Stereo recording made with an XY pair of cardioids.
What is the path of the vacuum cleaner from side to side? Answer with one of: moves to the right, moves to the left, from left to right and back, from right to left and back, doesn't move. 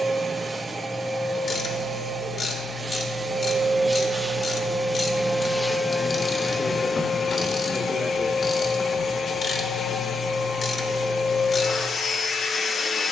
moves to the left.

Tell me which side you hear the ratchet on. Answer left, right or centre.
left.